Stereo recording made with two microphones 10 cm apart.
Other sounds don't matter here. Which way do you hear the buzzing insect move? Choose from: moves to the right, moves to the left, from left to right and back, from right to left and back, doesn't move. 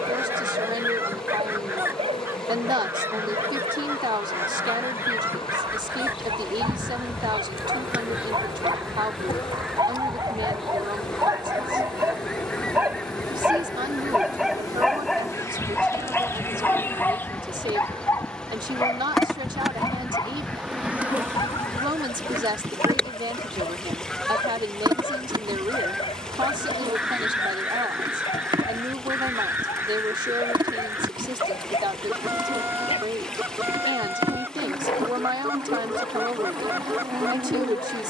moves to the right.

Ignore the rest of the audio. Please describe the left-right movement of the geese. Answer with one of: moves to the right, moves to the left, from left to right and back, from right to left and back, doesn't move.
from right to left and back.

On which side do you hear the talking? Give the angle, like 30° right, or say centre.
50° right.